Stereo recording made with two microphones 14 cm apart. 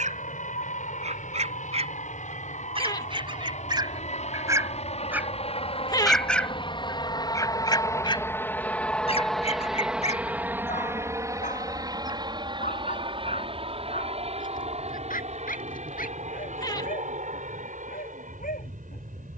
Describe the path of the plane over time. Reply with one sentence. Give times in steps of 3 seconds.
In this clip you hear the plane on the left from 0 s, in the centre from 9 s and on the right from 12 s.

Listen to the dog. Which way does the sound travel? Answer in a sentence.
In this clip you hear the dog move from right to left.